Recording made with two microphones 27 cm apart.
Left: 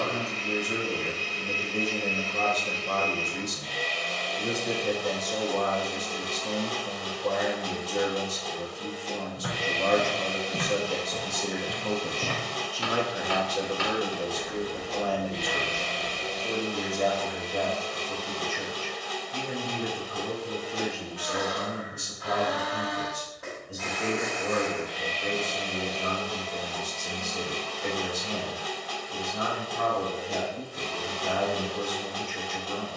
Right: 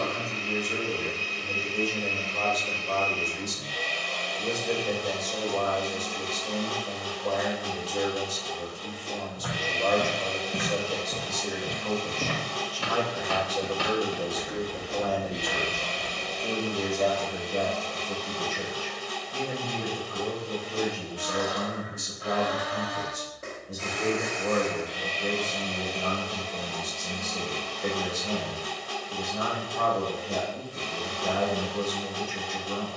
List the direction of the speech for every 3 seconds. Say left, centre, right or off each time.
left, left, left, left, centre, right, right, right, right, right, right.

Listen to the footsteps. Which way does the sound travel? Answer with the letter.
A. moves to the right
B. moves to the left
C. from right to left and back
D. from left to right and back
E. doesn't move
D.